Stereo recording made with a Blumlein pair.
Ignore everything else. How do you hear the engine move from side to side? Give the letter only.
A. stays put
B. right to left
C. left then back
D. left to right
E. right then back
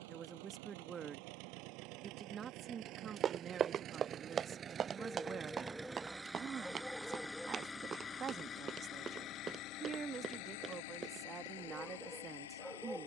B.